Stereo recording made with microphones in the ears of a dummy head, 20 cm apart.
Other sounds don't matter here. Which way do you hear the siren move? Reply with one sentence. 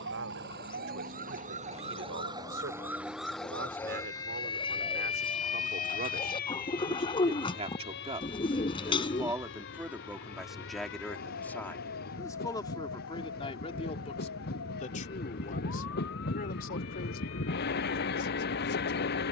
You can hear the siren move to the left.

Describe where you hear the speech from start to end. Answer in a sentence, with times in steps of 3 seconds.
You can hear the speech on the right from 0 s, in the centre from 9 s and on the left from 12 s.